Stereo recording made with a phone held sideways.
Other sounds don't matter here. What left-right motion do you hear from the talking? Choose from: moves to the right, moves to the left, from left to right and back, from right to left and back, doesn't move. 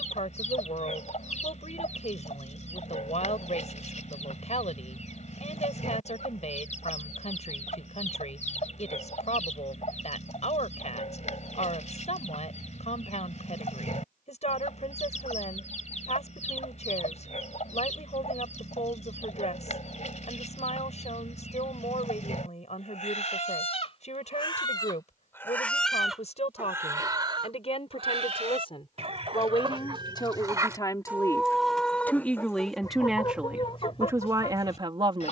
moves to the right.